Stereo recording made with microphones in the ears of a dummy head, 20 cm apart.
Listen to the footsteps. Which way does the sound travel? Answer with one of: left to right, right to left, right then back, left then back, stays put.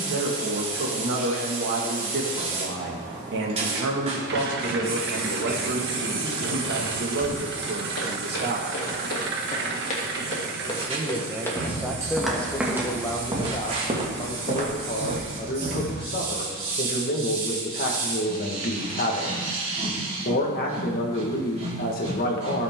left to right.